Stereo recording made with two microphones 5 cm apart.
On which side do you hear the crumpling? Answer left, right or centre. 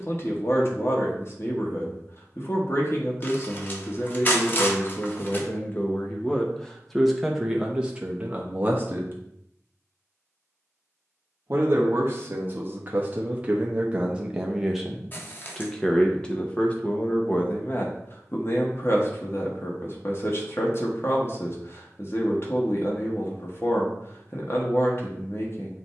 left.